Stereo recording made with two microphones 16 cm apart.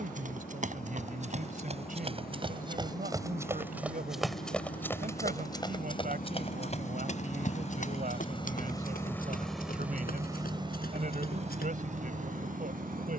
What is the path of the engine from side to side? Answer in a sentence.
In this clip you hear the engine move to the right.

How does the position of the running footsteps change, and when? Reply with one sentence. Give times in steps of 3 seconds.
You can hear the running footsteps on the right from 0 s, in the centre from 3 s, on the left from 6 s and not at all from 12 s.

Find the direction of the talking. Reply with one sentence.
You can hear the talking on the right.